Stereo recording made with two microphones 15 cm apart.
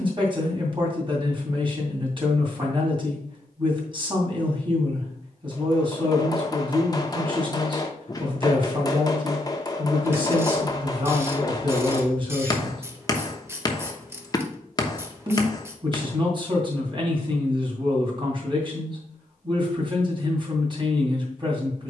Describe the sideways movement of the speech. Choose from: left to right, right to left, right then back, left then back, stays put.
stays put.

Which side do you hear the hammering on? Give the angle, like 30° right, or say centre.
30° left.